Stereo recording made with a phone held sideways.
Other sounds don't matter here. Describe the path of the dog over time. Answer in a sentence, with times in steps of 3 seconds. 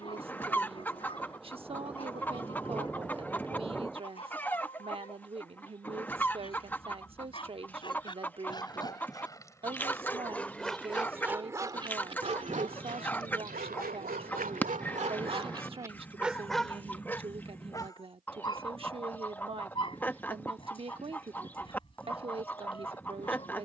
You can hear the dog on the left from 0 s, in the centre from 9 s, on the right from 12 s, in the centre from 15 s and on the left from 18 s.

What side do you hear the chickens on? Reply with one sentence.
You can hear the chickens in the centre.